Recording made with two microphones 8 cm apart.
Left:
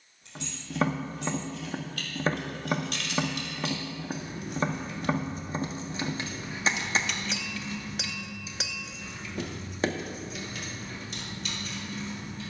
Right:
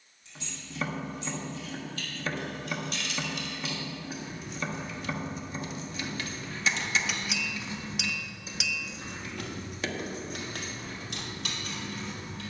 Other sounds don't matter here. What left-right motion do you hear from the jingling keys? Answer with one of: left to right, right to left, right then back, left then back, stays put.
left to right.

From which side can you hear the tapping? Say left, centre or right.
left.